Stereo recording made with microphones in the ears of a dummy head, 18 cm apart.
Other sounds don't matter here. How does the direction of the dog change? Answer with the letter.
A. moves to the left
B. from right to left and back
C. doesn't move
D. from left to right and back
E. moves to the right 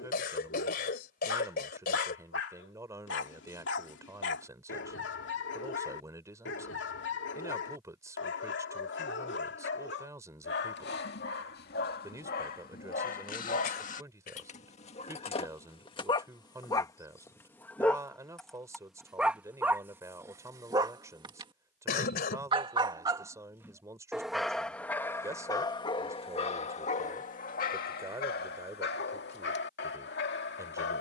D.